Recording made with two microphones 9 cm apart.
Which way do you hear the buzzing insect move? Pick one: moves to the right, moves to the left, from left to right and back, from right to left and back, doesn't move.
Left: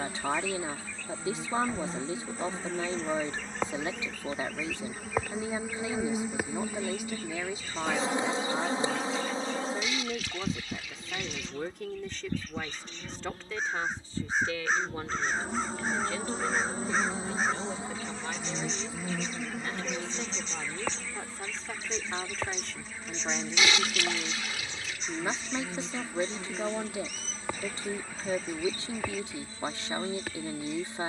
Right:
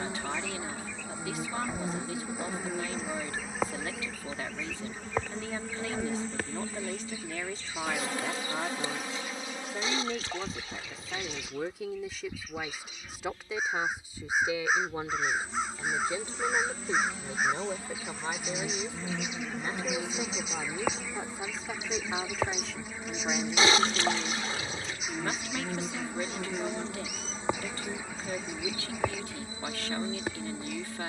from right to left and back.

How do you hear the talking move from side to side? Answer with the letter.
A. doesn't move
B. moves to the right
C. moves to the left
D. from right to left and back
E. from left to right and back
E.